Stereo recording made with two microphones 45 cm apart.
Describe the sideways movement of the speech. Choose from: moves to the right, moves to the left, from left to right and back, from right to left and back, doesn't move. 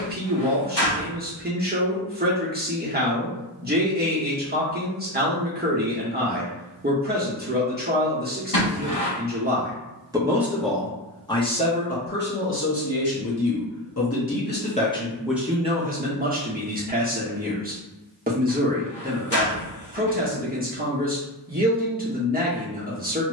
from right to left and back.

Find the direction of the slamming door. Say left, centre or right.
left.